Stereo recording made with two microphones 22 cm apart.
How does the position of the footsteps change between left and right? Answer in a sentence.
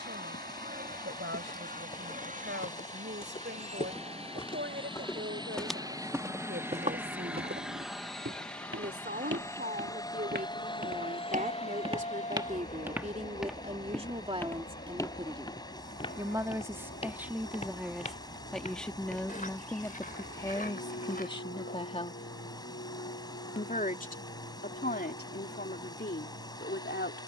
In this clip you hear the footsteps go right and come back.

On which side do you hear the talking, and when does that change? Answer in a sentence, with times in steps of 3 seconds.
You can hear the talking on the right from 0 s, in the centre from 15 s and on the left from 21 s.